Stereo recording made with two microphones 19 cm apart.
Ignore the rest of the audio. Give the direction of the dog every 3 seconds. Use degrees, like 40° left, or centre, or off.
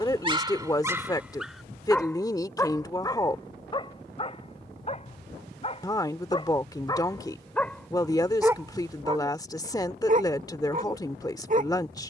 10° right, 30° left, 10° left, 40° right.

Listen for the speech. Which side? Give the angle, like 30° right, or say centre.
20° left.